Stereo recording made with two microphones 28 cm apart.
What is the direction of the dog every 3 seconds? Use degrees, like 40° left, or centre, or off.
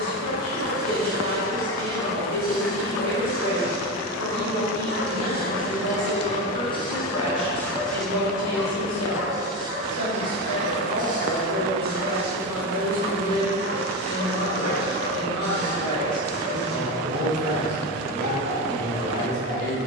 50° left, 40° left, 10° left, 20° right, 40° right, 40° right, 40° right.